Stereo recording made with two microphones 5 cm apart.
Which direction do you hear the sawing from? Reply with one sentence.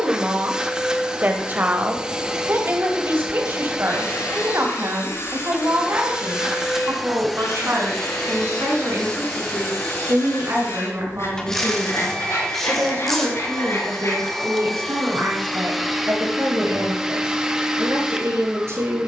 In this clip you hear the sawing on the left.